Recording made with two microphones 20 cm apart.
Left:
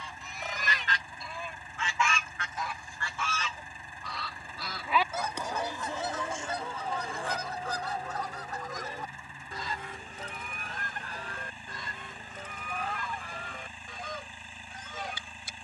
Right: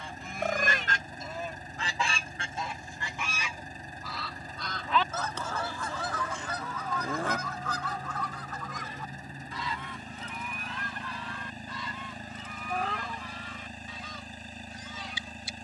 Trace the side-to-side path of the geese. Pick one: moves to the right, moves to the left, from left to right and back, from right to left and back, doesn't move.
moves to the left.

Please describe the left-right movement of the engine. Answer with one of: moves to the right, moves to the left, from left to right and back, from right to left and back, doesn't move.
doesn't move.